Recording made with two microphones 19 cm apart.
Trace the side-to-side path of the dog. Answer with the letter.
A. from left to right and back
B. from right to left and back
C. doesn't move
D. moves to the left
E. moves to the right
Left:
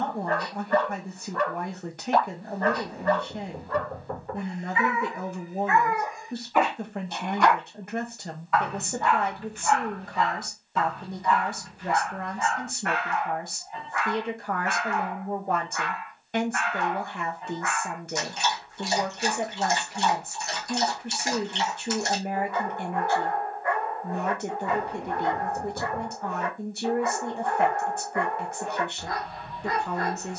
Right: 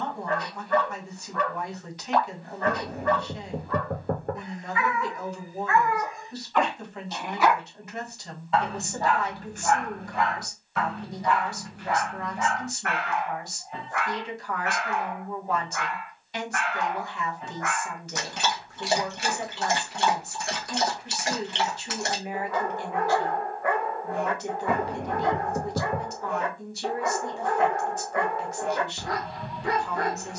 E.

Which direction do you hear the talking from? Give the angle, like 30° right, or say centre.
50° left.